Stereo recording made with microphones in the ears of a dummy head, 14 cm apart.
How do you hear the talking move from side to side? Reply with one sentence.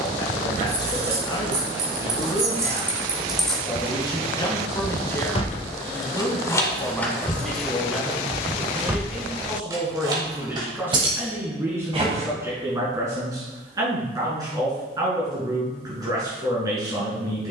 You can hear the talking go from the left side to the right.